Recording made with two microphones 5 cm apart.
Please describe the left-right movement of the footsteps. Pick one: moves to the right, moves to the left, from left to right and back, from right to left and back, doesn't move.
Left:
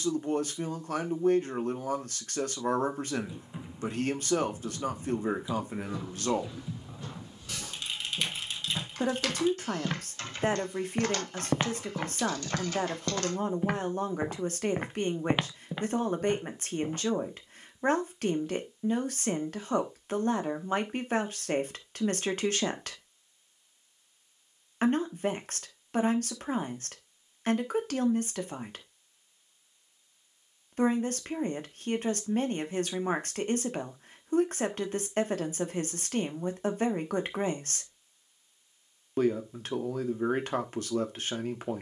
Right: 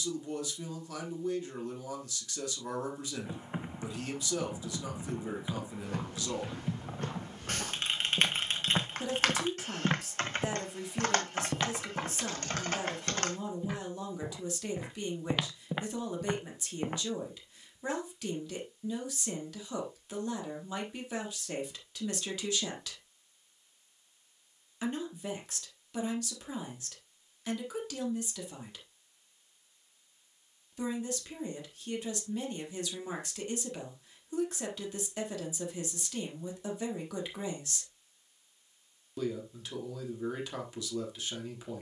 from right to left and back.